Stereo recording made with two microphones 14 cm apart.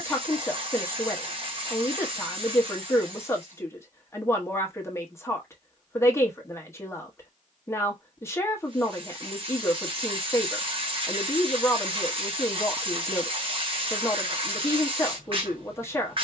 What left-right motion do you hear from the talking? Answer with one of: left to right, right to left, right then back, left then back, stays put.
stays put.